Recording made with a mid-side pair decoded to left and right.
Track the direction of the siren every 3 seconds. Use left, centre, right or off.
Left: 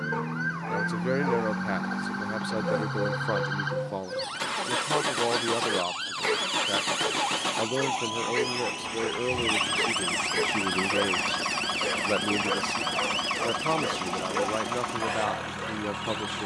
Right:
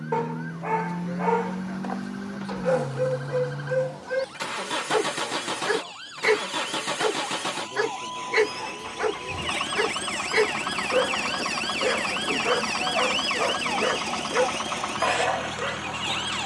left, left, left, centre, right, right.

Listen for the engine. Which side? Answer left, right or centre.
centre.